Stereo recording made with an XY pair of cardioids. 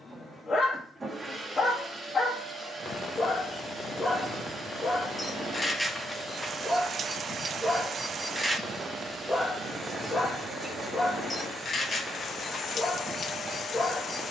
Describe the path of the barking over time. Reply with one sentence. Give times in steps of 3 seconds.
In this clip you hear the barking on the left from 0 s, in the centre from 6 s and on the left from 9 s.